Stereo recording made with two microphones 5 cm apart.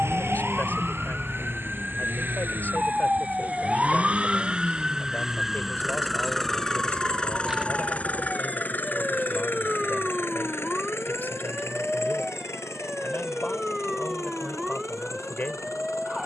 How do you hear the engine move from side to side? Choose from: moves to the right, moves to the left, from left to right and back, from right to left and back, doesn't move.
moves to the left.